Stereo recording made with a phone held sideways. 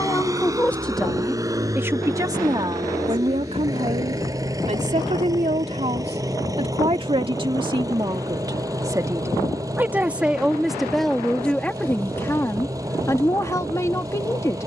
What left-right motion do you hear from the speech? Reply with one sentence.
In this clip you hear the speech go right and come back.